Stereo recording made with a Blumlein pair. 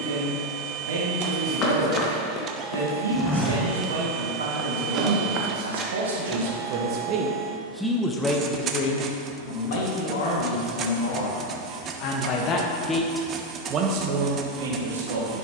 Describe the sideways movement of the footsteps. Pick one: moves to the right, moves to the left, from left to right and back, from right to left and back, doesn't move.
moves to the right.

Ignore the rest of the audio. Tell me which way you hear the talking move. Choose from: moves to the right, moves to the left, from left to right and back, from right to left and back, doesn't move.
from right to left and back.